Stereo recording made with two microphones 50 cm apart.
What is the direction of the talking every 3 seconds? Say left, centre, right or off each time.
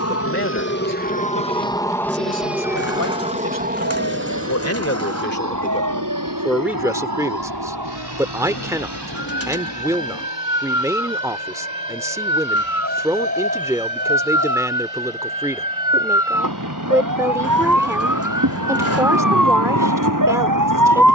left, left, centre, centre, centre, centre, centre.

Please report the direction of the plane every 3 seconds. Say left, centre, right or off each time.
centre, right, right, right, right, right, right.